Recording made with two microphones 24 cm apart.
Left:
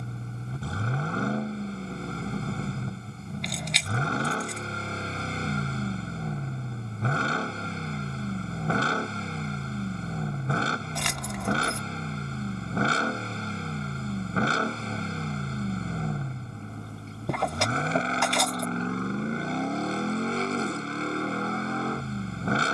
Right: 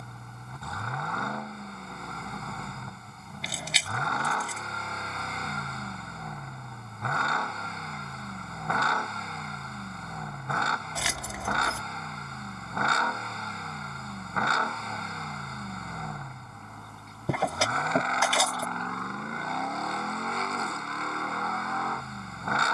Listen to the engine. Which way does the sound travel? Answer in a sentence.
In this clip you hear the engine stay in one place.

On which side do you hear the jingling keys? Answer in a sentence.
You can hear the jingling keys in the centre.